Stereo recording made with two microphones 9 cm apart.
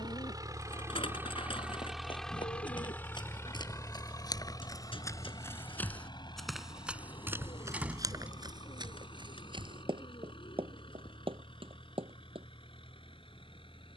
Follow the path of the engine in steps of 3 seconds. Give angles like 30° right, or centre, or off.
10° right, 40° left, 60° left, 70° left, 70° left.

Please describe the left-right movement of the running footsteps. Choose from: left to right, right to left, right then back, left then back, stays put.
left to right.